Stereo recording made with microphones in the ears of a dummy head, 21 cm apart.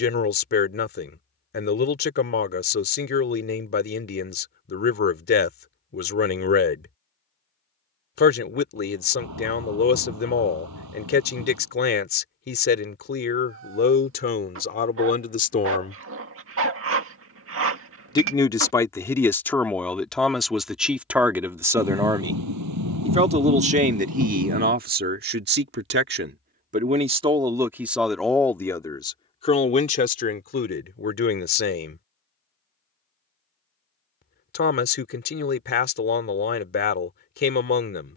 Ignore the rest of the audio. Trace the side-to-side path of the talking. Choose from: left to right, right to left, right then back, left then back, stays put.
right then back.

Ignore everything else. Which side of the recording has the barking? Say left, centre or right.
right.